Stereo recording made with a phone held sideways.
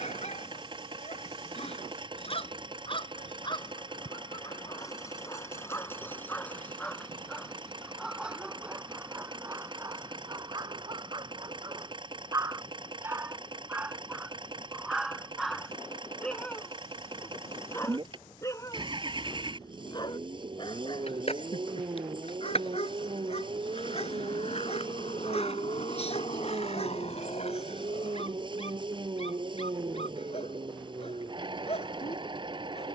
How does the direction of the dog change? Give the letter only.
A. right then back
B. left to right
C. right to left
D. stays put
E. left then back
A.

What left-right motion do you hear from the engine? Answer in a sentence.
In this clip you hear the engine stay in one place.